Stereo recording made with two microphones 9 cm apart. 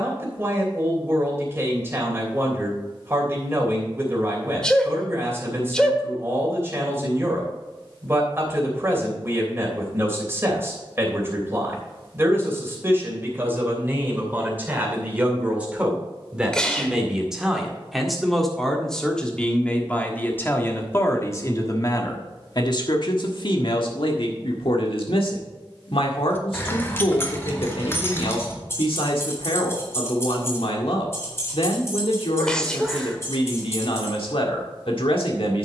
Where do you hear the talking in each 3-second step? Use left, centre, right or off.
right, right, right, right, right, centre, centre, left, left, left, left, left.